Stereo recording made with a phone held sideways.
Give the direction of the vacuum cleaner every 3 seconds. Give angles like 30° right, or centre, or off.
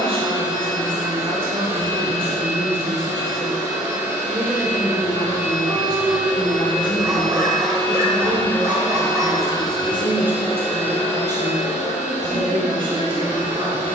20° right, 20° right, centre, 40° left, 60° left.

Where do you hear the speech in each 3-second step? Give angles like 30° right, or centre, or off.
40° right, 10° left, 30° left, 20° right, 40° right.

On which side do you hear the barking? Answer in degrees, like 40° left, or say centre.
20° right.